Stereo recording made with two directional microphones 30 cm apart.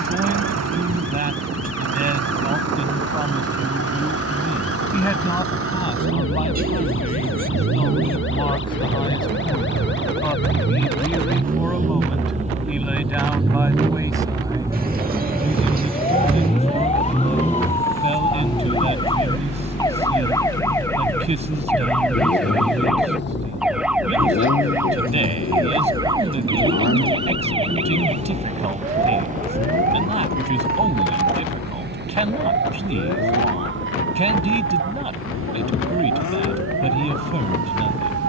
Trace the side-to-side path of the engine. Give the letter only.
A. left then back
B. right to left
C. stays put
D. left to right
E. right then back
B.